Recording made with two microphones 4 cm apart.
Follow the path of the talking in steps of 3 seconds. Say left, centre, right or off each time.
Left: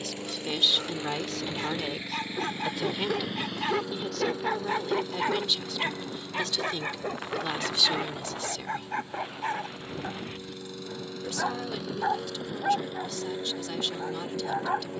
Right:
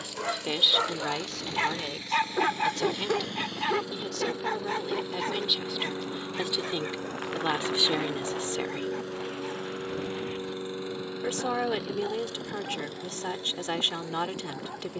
centre, centre, right, right, right.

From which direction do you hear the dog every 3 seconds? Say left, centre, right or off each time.
right, centre, left, left, left.